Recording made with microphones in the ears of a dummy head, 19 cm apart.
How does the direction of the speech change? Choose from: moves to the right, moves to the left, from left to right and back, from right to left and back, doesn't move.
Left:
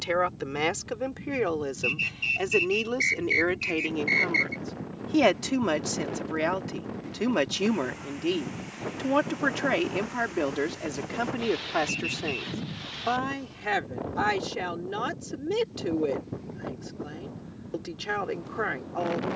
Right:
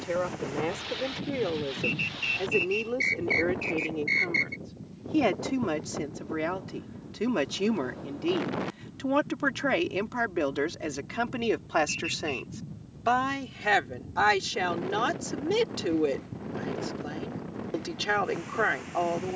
moves to the right.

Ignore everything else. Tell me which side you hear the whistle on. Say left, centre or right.
centre.